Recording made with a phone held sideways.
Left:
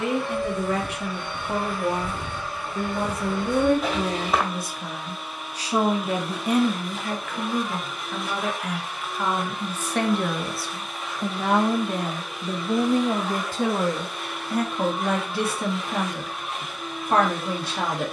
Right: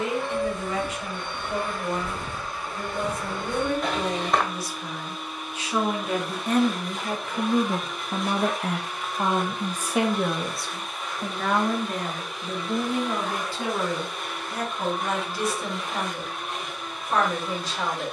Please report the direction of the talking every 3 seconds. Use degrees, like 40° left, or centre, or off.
60° left, 50° left, 10° right, centre, 40° left, 60° left.